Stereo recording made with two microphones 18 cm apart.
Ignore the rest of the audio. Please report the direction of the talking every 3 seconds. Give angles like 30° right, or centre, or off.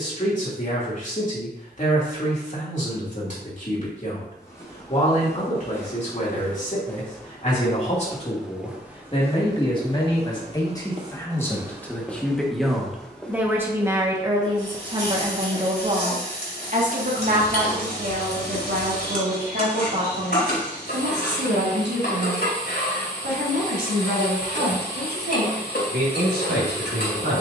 50° left, 50° left, 40° left, 20° left, 10° right, 50° right, 70° right, 80° right, 80° right.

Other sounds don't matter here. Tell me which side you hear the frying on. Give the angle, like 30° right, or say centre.
70° left.